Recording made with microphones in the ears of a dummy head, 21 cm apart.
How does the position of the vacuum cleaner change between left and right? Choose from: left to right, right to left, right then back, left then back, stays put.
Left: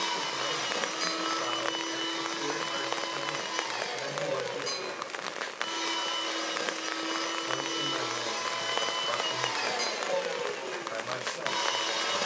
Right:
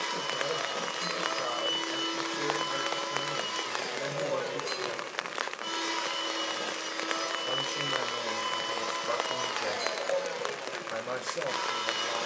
right then back.